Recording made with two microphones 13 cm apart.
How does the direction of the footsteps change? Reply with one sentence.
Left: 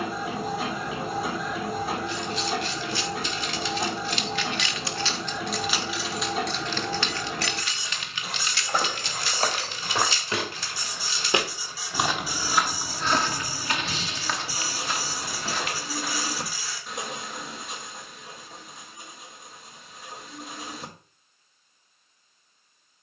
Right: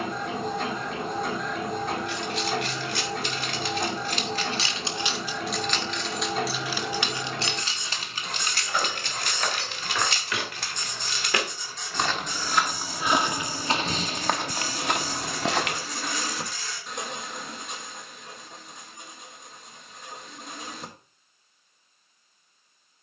You can hear the footsteps travel towards the right.